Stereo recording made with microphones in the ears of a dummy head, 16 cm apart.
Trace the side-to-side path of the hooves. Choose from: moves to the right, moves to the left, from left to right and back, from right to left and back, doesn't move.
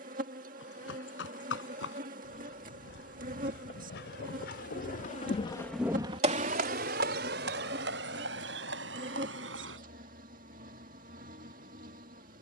moves to the right.